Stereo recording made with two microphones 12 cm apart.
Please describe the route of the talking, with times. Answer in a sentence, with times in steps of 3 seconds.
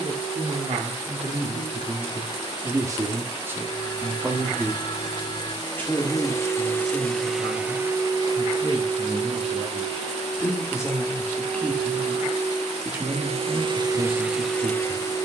In this clip you hear the talking on the right from 0 s, in the centre from 3 s, on the left from 6 s and on the right from 12 s.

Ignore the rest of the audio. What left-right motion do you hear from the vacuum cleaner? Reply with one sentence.
In this clip you hear the vacuum cleaner move from left to right and back again.